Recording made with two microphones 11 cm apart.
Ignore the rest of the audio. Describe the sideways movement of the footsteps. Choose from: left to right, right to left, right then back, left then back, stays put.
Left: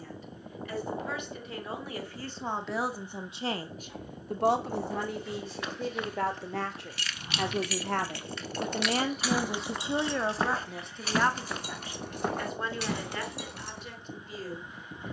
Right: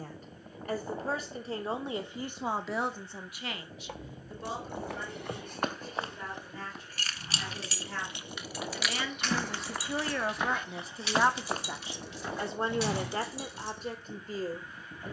left then back.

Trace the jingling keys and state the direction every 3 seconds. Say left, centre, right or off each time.
off, right, right, left, left.